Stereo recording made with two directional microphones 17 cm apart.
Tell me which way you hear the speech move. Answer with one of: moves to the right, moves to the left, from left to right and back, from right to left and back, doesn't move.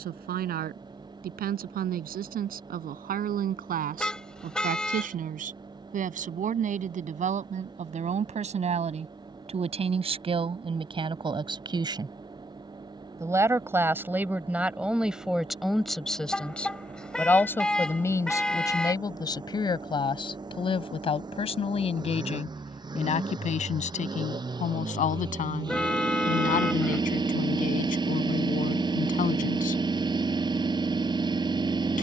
moves to the left.